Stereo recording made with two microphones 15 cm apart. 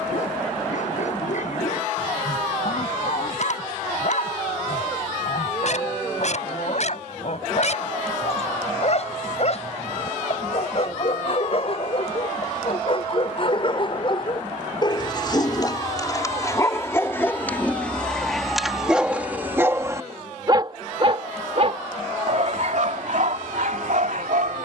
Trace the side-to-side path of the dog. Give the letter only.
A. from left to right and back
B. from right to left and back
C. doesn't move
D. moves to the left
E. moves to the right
E.